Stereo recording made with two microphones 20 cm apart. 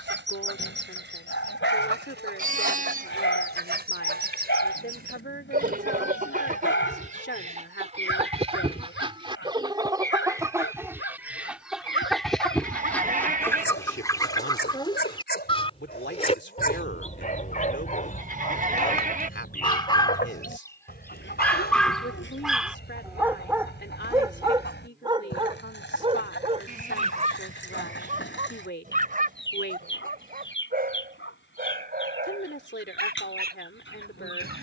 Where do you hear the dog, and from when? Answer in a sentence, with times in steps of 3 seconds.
In this clip you hear the dog on the left from 0 s, in the centre from 21 s and on the right from 24 s.